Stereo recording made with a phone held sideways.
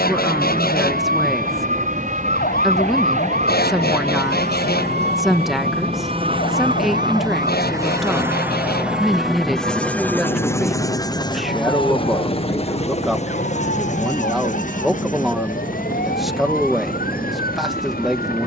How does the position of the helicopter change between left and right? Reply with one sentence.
In this clip you hear the helicopter travel towards the left.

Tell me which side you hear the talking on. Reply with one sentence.
In this clip you hear the talking in the centre.